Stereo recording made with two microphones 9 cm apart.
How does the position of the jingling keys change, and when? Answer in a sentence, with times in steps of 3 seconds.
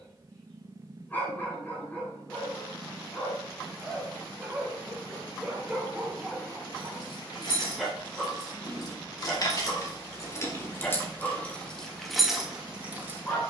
In this clip you hear the jingling keys not at all from 0 s, on the left from 6 s and in the centre from 12 s.